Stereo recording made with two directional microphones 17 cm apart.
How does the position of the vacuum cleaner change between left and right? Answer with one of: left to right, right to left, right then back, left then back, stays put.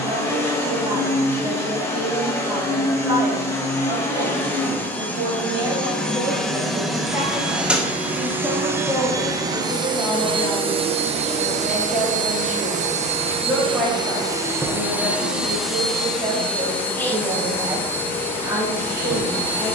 right then back.